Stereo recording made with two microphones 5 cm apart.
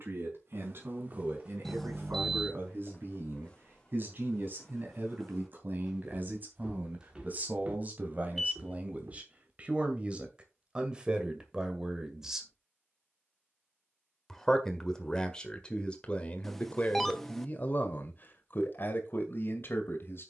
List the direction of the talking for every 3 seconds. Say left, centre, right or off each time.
right, right, right, right, centre, left, left.